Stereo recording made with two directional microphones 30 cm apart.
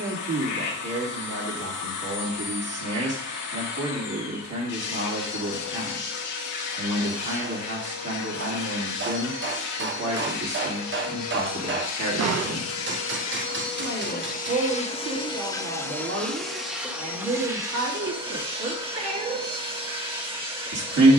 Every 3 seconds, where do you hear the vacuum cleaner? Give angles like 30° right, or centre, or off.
70° left, 70° left, 70° left, 60° left, 40° left, centre, 20° right.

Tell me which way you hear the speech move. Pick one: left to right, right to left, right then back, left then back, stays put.
stays put.